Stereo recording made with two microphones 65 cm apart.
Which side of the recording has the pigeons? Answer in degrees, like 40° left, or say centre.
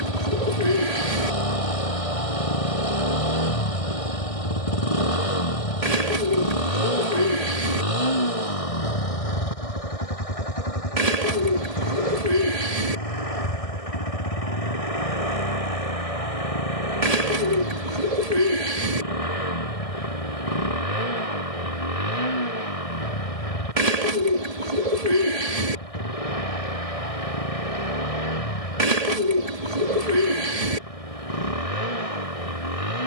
70° right.